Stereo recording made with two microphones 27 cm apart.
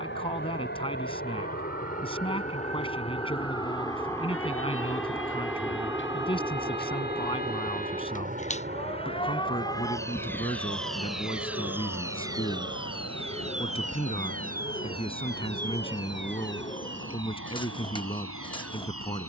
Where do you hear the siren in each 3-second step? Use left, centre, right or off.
left, left, left, centre, right, right, right.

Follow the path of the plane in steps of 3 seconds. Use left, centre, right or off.
left, centre, right, right, right, right, right.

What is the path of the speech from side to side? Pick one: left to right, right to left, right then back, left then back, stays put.
stays put.